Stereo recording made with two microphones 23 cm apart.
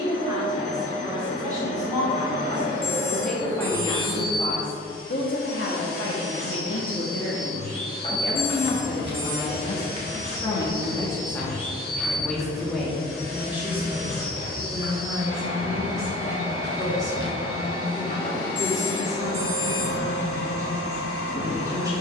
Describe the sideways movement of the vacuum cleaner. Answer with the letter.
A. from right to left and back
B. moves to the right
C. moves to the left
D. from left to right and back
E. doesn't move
E.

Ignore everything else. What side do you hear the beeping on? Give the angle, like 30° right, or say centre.
20° left.